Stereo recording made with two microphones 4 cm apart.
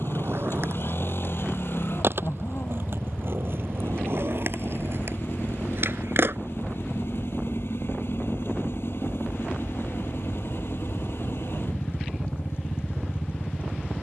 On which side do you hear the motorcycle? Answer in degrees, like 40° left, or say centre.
60° left.